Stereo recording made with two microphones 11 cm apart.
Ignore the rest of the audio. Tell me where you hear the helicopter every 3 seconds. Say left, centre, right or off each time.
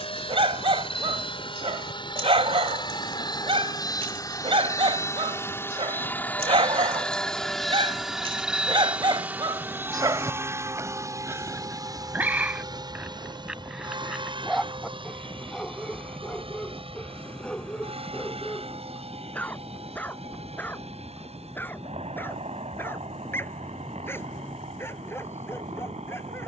left, left, centre, right, right, right, right, right, right.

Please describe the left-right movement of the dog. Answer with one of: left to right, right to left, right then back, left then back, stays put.
right to left.